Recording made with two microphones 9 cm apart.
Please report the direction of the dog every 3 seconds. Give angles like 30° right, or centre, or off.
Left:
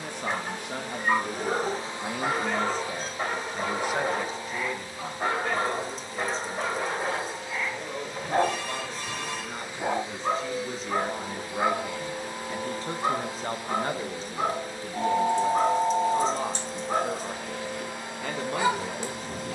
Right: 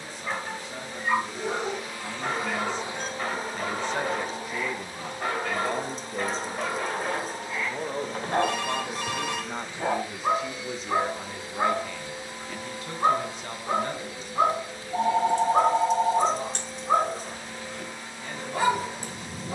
20° left, 20° left, 10° left, 20° right, 40° right, 40° right, 40° right.